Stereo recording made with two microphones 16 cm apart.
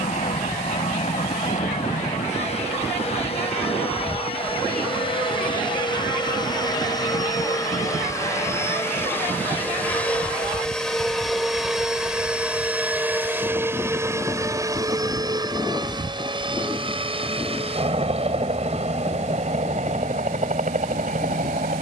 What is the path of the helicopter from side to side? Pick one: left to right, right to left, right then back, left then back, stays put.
left to right.